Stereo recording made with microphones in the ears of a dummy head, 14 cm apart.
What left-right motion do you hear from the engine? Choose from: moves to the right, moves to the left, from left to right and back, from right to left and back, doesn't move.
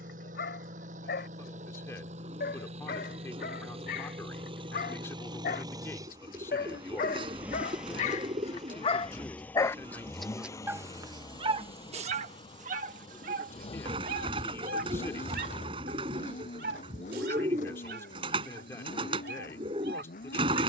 moves to the left.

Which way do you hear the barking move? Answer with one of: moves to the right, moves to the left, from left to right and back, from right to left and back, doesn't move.
moves to the right.